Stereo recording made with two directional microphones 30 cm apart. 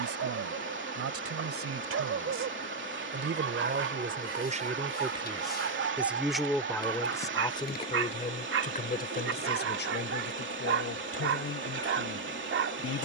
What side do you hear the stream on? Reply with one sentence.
In this clip you hear the stream on the right.